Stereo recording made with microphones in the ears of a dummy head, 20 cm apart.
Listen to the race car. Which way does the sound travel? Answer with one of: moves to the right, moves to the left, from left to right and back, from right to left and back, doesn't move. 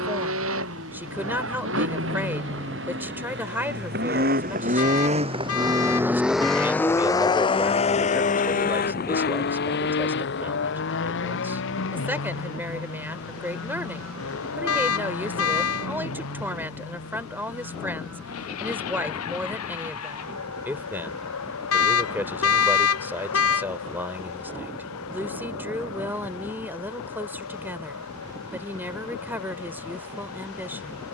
moves to the left.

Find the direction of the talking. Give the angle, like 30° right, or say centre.
10° right.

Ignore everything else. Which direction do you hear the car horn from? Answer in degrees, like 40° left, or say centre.
80° left.